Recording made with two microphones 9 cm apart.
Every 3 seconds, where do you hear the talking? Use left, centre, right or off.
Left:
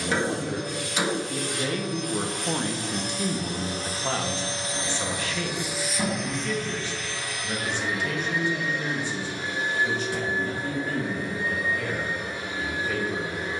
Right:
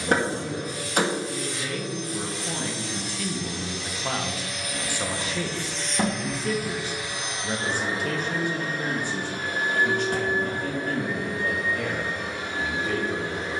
left, centre, right, right, right.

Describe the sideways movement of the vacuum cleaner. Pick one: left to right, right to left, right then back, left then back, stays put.
left to right.